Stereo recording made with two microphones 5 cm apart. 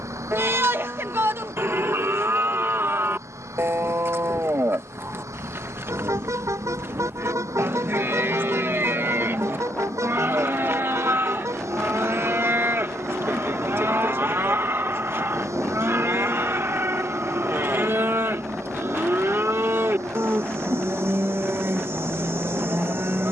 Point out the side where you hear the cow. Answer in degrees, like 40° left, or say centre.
50° right.